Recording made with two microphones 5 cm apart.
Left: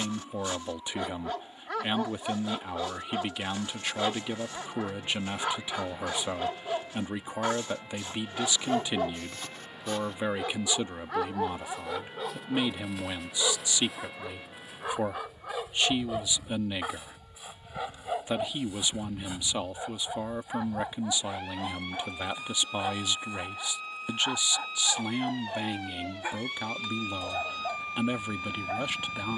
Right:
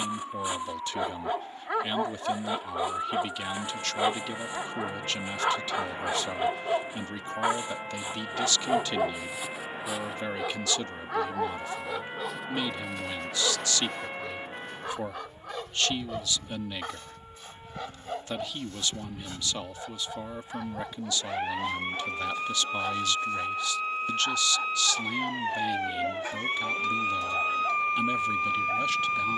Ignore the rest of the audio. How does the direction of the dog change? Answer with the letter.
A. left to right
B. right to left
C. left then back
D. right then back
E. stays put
B.